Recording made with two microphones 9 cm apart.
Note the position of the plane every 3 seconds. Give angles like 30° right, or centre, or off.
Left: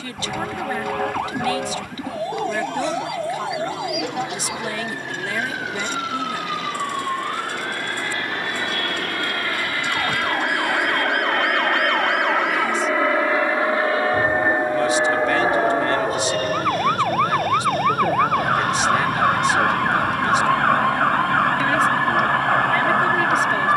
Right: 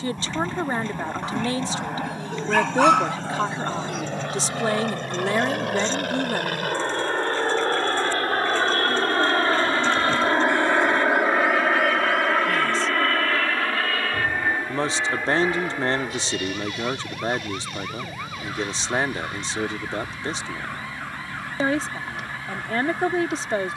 80° right, 70° right, 50° right, 20° right, 20° left, 40° left, 50° left, 60° left.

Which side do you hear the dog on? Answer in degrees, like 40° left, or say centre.
70° right.